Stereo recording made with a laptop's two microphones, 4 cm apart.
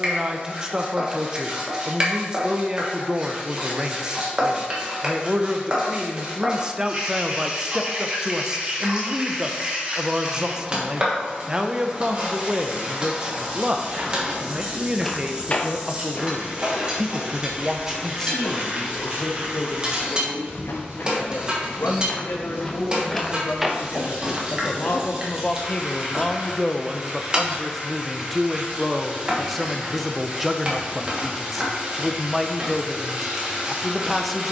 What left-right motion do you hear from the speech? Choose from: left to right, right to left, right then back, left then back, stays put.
left then back.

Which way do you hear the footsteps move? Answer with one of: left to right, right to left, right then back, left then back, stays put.
left then back.